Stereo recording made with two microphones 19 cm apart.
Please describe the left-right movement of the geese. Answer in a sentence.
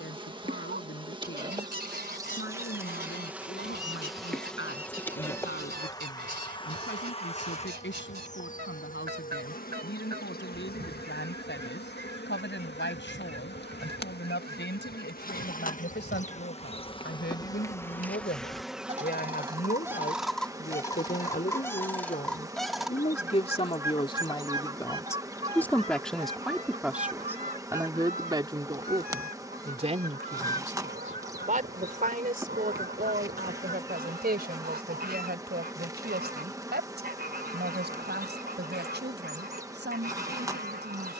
You can hear the geese go left and come back.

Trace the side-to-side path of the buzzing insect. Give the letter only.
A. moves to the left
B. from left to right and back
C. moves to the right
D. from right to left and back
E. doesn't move
D.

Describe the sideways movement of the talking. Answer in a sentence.
In this clip you hear the talking move from left to right.